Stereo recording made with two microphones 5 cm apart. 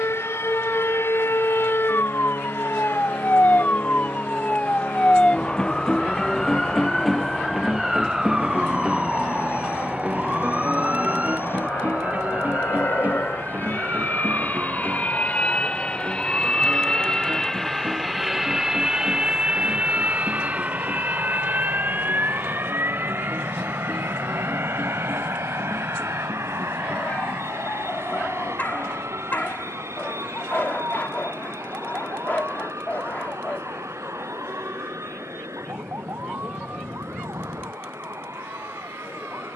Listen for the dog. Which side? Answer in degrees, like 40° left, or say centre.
40° left.